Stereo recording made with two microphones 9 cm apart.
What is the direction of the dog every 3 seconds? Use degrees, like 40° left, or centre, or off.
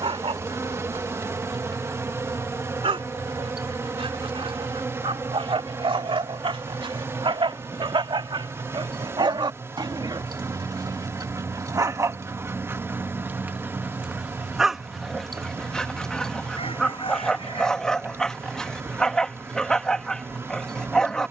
80° right, 70° right, 60° right, 50° right, 20° right, 10° left, 10° left.